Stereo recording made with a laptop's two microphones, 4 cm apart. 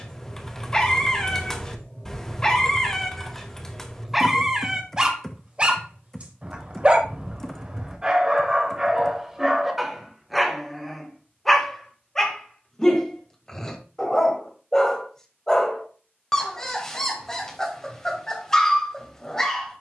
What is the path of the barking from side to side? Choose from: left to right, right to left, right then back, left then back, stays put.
right then back.